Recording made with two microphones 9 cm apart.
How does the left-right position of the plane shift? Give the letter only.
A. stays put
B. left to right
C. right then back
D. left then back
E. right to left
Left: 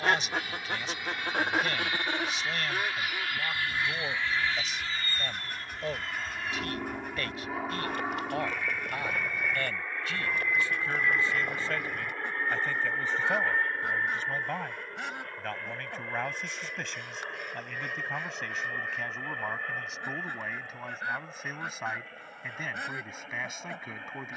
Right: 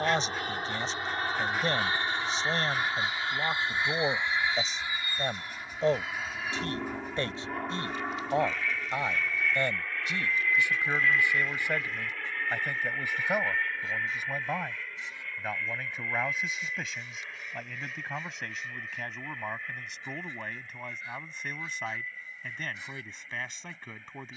E.